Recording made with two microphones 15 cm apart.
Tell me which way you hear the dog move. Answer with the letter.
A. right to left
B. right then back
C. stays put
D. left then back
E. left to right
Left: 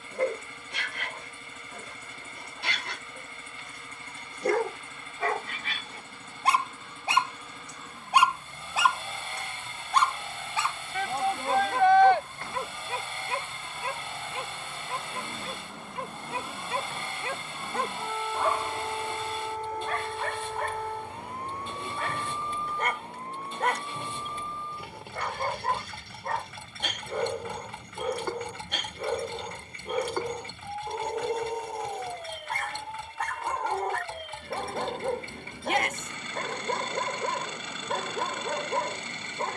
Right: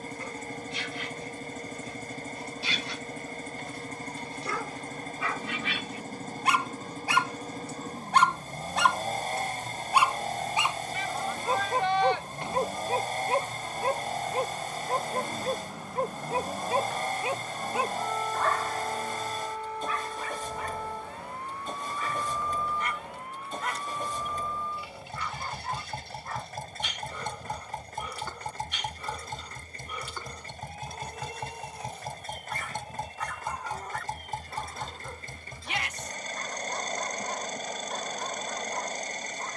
B.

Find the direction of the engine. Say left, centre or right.
right.